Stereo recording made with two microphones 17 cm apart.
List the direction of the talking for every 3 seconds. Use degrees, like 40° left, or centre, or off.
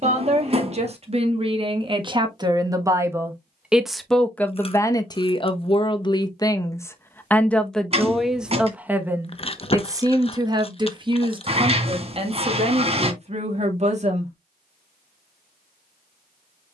30° right, 10° left, 10° left, 30° right, 40° right, off.